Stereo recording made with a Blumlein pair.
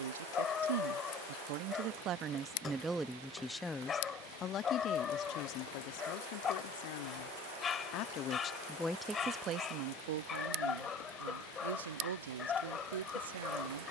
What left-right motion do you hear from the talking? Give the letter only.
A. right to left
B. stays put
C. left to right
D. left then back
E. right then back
D.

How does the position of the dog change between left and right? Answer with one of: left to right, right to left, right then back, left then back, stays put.
stays put.